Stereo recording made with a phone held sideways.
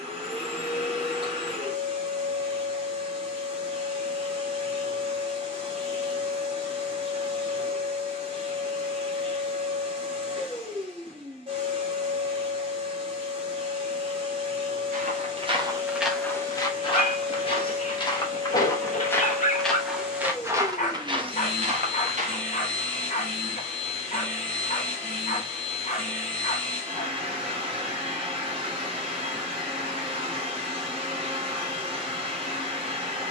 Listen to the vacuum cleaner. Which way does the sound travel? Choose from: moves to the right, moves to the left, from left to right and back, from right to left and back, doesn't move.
doesn't move.